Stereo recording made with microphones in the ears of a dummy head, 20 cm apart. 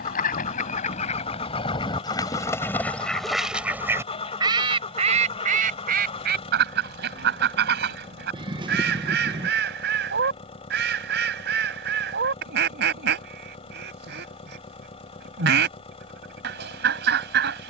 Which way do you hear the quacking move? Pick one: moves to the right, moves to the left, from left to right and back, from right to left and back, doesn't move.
moves to the right.